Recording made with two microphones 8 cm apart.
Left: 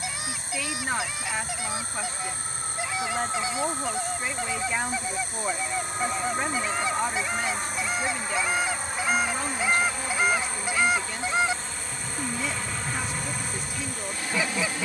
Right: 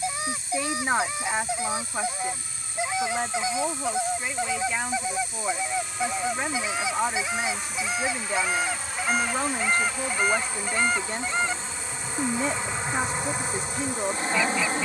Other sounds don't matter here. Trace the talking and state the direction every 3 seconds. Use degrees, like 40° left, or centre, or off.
20° right, centre, 10° right, 40° right, 40° right.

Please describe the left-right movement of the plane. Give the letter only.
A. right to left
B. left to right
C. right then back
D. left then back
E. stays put
B.